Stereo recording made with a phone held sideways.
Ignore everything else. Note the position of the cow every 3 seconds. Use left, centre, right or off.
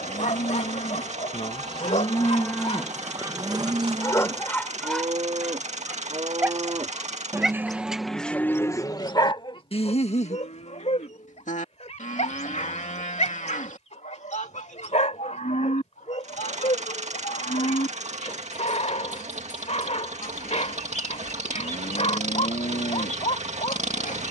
left, right, centre, left, left, left, left, left.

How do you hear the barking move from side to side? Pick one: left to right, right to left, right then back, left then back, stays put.
right then back.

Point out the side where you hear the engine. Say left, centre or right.
right.